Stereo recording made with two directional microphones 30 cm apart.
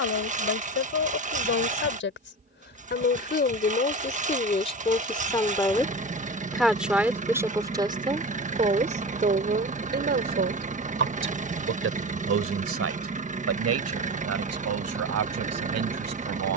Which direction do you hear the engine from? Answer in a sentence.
In this clip you hear the engine on the right.